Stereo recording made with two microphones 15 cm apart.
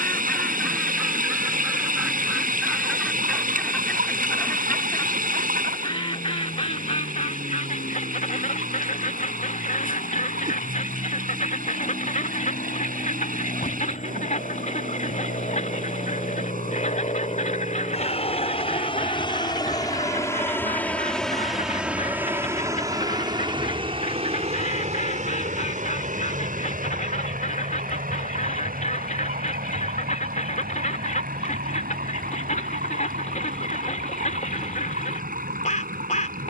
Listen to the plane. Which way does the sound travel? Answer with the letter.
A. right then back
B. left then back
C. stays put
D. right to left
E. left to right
E.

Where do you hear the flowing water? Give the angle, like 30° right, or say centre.
70° right.